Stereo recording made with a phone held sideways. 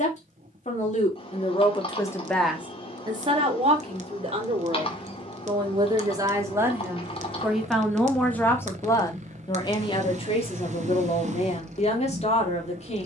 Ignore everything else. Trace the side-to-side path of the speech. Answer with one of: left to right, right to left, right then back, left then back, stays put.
right then back.